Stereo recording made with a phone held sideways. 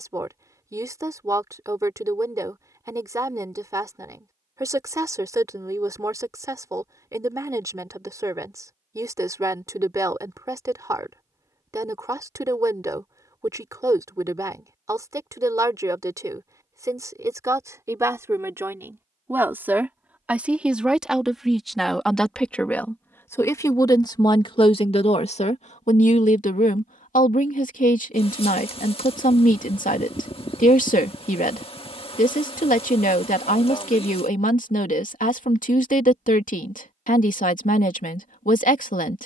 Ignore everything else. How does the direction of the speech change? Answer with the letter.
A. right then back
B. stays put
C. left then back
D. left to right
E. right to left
E.